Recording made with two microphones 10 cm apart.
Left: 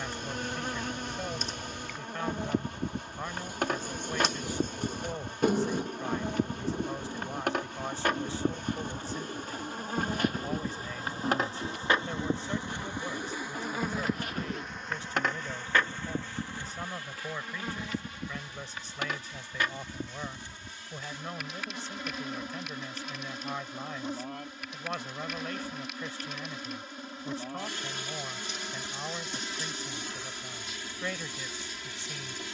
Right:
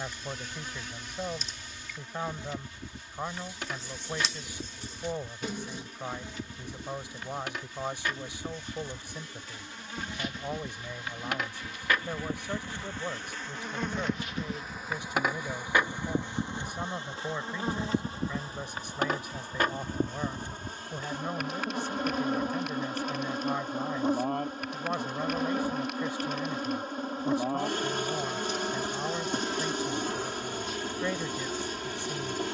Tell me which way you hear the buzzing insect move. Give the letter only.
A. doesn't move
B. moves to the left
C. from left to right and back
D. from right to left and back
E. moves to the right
E.